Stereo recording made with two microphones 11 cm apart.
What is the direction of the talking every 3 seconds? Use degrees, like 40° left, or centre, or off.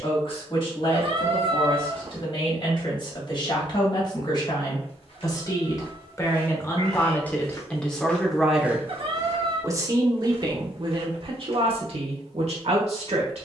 50° left, 40° left, 10° left, 40° right, 70° right.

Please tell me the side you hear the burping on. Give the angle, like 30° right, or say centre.
50° right.